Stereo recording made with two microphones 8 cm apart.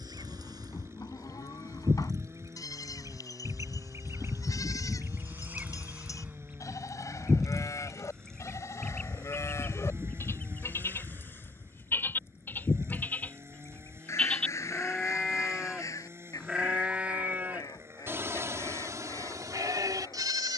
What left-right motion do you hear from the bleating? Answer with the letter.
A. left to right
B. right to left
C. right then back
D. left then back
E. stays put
A.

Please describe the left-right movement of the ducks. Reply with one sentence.
In this clip you hear the ducks go from the right side to the left.